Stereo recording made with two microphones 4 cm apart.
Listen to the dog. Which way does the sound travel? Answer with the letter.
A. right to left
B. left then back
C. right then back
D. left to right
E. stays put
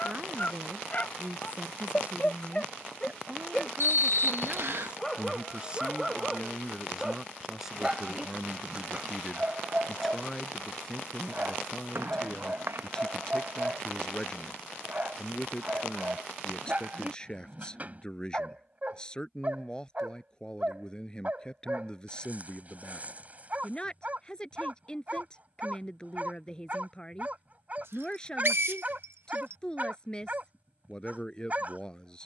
D.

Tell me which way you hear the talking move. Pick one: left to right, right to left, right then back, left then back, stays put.
right to left.